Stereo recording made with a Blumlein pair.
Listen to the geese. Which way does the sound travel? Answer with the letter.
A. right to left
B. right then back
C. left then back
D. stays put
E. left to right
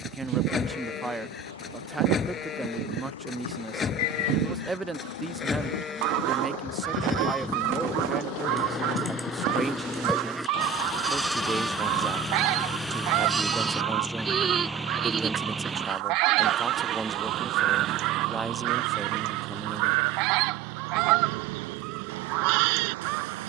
D.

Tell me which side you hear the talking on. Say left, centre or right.
centre.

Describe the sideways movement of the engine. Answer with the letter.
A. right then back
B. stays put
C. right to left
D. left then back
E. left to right
E.